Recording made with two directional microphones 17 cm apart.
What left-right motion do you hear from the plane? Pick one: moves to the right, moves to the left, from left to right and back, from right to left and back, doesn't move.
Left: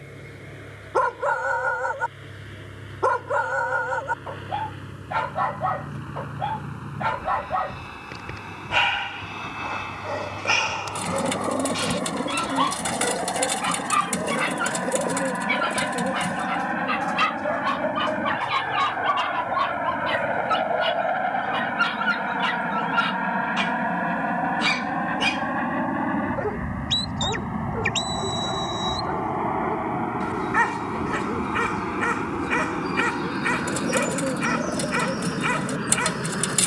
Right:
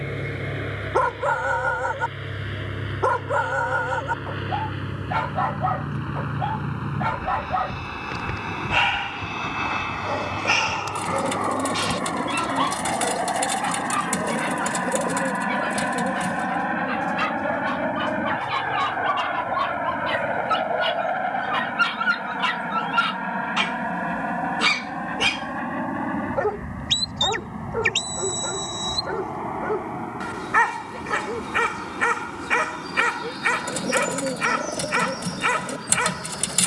moves to the left.